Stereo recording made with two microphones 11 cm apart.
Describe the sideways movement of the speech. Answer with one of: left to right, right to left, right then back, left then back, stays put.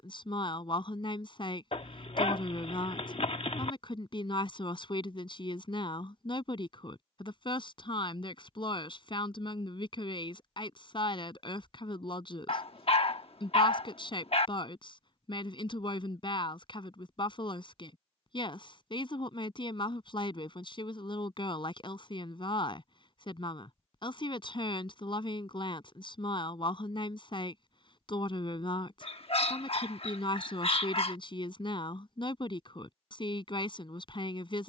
stays put.